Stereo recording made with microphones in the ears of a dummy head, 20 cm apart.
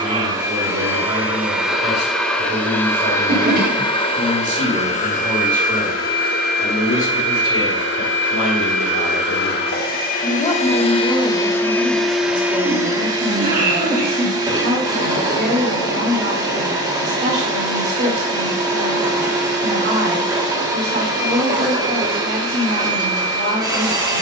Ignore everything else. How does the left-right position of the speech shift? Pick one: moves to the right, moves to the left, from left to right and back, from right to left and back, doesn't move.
from right to left and back.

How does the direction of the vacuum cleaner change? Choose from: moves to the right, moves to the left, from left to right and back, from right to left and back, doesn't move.
from right to left and back.